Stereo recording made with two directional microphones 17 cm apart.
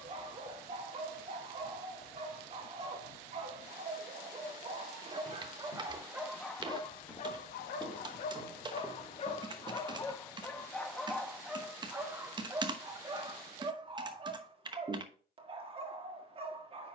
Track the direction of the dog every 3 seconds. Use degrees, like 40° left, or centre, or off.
40° right, 30° right, 30° left, 10° left, 20° right, 30° right.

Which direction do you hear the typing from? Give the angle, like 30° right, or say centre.
30° right.